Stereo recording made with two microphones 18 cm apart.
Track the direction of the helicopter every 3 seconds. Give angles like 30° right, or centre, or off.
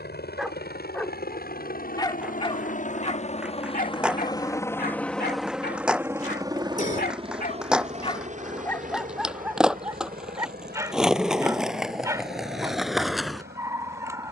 60° left, 20° left, 30° right, 50° right, 60° right.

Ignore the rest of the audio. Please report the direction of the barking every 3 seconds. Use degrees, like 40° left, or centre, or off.
10° left, 60° left, 40° left, 10° right, 20° right.